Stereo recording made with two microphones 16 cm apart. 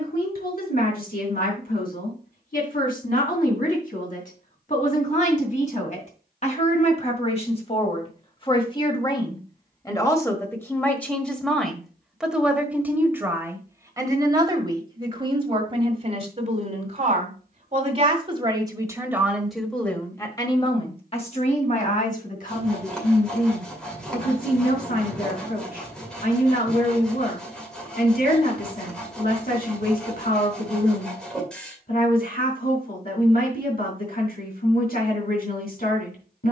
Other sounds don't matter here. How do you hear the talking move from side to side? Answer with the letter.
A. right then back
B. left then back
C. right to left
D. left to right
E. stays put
A.